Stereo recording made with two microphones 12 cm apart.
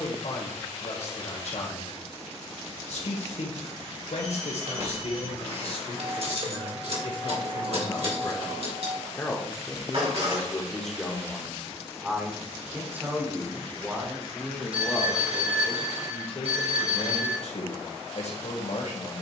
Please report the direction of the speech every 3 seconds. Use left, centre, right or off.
left, left, left, centre, centre, left, left.